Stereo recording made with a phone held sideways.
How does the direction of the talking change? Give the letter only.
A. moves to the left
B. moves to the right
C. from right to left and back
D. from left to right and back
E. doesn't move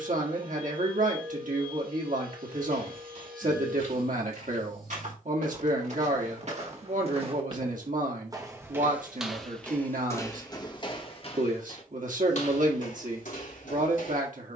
E.